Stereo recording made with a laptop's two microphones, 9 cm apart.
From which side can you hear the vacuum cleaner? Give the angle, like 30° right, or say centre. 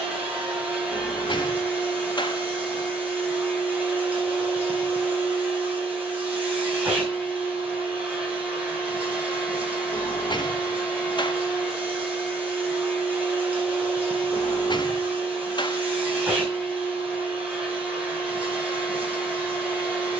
20° right.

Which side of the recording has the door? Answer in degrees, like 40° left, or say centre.
50° left.